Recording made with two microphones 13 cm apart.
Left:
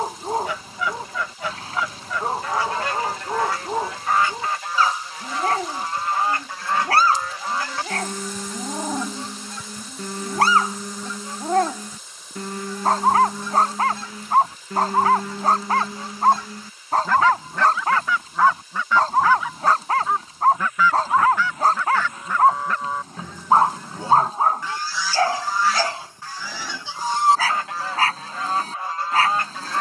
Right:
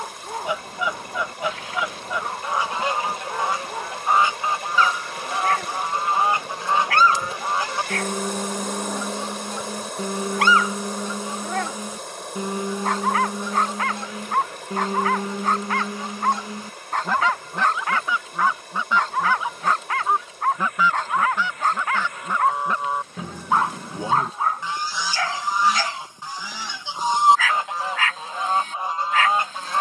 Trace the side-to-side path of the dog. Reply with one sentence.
In this clip you hear the dog stay in one place.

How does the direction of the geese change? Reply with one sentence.
In this clip you hear the geese stay in one place.